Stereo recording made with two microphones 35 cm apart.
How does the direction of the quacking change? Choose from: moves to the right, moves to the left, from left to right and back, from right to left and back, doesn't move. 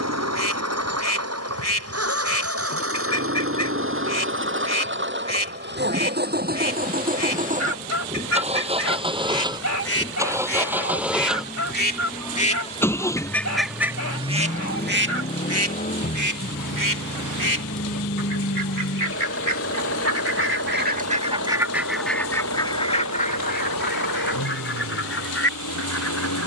from left to right and back.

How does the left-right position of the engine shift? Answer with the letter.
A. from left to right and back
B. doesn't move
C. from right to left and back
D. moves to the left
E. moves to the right
D.